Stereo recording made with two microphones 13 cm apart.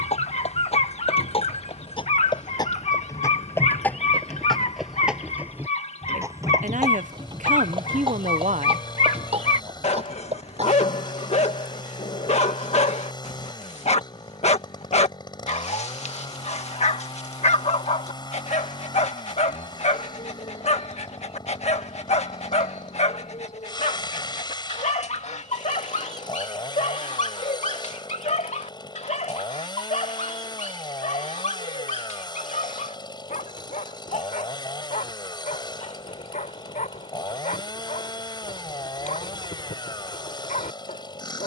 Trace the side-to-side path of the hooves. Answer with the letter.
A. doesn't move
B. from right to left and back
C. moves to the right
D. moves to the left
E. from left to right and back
C.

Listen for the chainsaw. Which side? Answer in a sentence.
In this clip you hear the chainsaw on the left.